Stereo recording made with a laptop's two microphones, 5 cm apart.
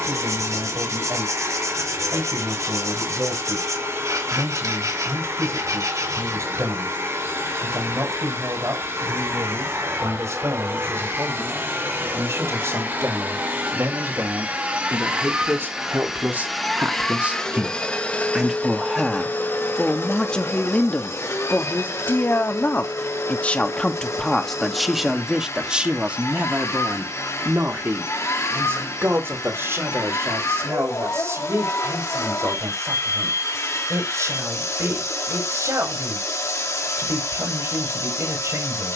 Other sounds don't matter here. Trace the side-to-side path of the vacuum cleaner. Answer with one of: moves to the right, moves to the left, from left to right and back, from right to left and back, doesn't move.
moves to the left.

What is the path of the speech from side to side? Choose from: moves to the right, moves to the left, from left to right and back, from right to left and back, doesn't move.
from right to left and back.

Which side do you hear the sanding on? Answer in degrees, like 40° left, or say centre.
80° right.